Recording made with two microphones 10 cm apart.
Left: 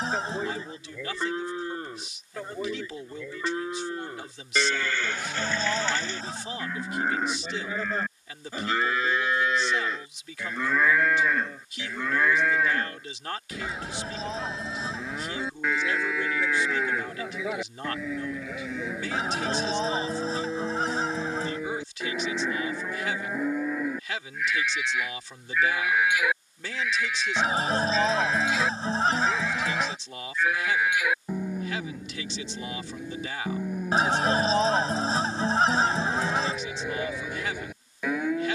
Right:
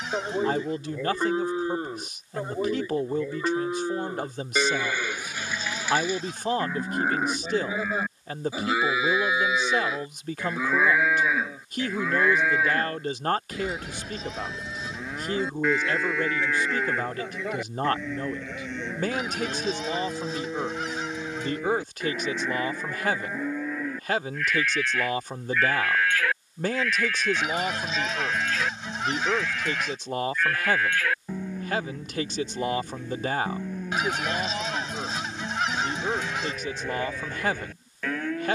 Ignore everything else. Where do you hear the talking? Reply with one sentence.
You can hear the talking on the right.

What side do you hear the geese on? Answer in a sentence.
You can hear the geese on the left.